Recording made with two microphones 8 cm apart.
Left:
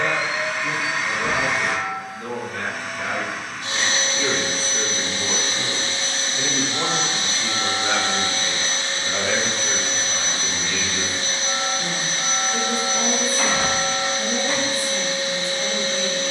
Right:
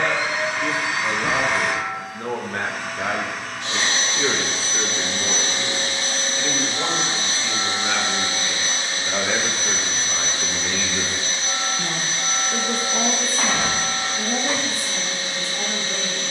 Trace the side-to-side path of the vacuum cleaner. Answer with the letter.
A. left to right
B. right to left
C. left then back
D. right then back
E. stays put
B.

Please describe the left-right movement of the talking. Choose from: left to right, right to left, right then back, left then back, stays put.
left then back.